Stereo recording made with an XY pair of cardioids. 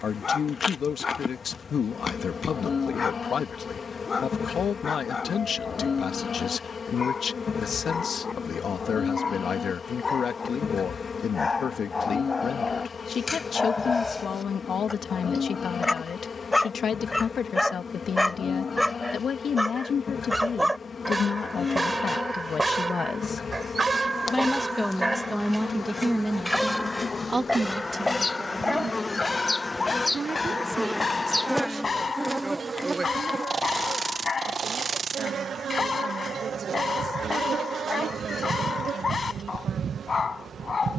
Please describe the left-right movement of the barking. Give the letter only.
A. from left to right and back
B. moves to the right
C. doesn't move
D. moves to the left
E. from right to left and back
A.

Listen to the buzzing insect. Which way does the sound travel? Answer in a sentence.
In this clip you hear the buzzing insect go from the left side to the right.